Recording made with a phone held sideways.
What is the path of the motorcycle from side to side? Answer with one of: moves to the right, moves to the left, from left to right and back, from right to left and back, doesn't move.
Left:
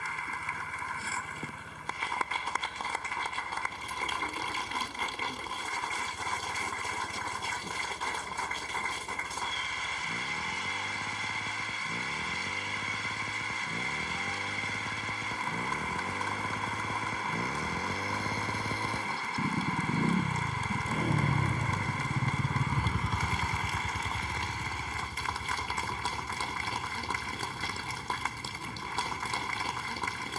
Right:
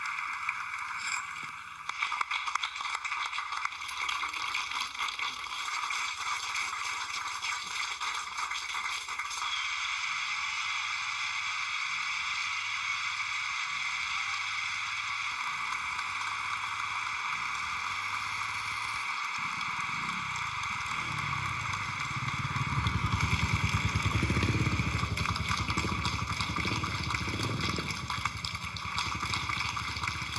moves to the right.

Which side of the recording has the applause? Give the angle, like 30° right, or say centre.
50° left.